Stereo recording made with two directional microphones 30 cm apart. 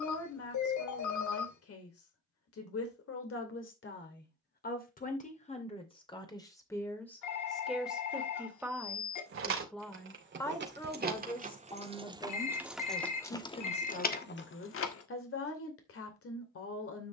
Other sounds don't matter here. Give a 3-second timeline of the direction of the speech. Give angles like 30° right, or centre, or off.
50° left, 30° left, centre, 10° left, 30° left, 50° left.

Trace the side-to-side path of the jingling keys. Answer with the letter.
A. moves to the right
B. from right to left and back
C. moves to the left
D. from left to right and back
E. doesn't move
C.